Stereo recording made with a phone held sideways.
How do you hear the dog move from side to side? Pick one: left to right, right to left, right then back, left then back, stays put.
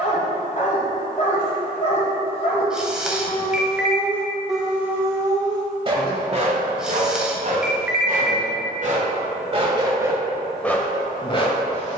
right then back.